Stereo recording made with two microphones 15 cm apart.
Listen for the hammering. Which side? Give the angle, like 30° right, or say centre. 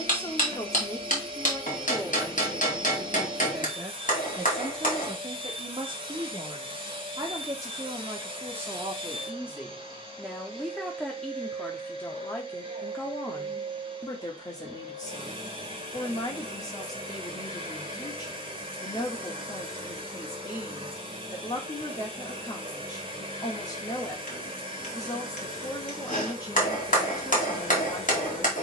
60° left.